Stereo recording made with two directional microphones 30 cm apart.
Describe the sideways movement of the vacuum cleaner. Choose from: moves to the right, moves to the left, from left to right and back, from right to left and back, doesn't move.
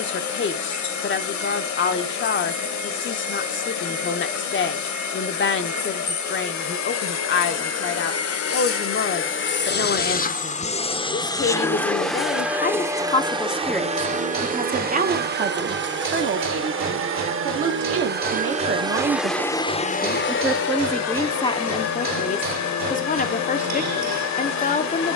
from left to right and back.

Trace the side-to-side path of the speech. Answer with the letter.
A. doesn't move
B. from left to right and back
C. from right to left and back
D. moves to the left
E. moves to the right
B.